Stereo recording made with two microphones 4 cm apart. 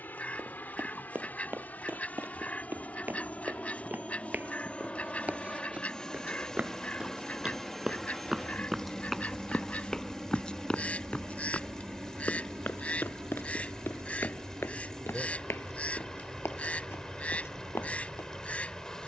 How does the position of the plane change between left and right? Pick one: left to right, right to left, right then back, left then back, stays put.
left to right.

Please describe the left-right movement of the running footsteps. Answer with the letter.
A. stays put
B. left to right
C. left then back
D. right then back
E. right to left
E.